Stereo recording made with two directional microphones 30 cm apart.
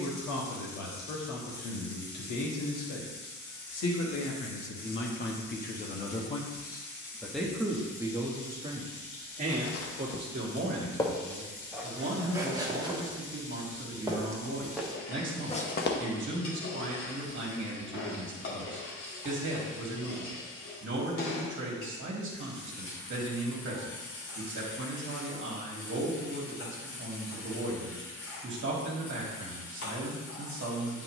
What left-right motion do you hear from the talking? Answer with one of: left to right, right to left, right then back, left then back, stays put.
left to right.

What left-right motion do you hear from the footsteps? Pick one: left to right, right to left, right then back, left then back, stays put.
right then back.